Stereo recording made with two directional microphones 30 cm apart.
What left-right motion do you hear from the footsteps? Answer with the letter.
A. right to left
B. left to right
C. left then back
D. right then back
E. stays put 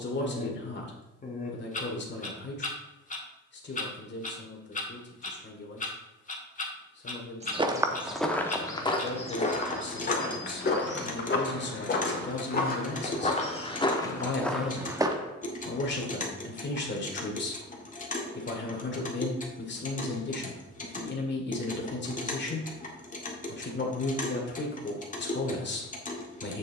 C.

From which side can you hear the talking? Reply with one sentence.
In this clip you hear the talking on the left.